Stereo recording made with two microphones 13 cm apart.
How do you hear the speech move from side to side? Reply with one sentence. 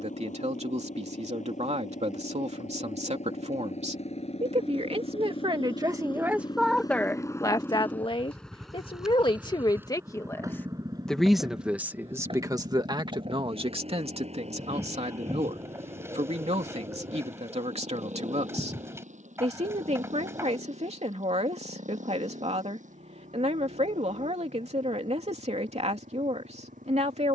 You can hear the speech go left and come back.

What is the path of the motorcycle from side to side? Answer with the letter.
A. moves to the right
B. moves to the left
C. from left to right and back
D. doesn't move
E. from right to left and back
A.